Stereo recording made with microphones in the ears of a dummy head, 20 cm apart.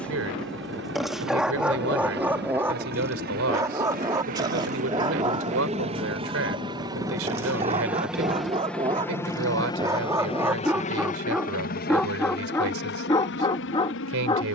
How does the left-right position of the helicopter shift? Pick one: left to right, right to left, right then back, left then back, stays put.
right to left.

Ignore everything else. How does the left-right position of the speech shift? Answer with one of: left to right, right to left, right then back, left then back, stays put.
stays put.